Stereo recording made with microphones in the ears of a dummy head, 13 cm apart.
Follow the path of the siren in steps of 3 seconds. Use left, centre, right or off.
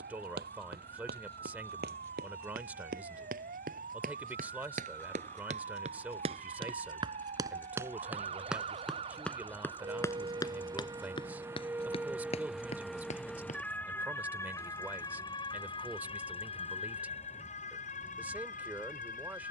right, right, right, right, centre, left, left.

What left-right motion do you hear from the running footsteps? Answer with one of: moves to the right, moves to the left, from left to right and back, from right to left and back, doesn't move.
moves to the left.